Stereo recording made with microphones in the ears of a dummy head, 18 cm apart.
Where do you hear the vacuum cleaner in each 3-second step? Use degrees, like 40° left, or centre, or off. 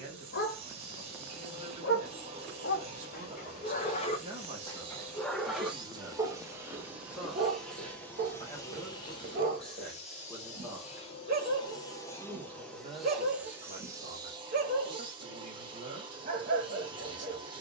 30° right, 30° right, centre, 30° left, 10° right, 20° right.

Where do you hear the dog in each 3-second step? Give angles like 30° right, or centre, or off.
50° left, 20° left, 30° right, 40° right, 40° right, 40° right.